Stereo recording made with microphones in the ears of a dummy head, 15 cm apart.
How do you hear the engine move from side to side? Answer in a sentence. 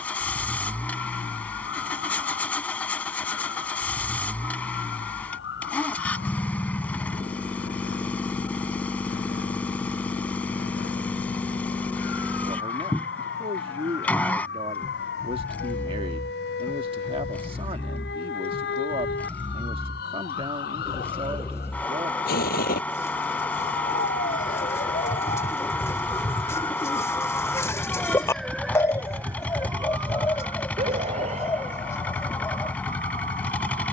In this clip you hear the engine stay in one place.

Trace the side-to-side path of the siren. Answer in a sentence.
In this clip you hear the siren move to the right.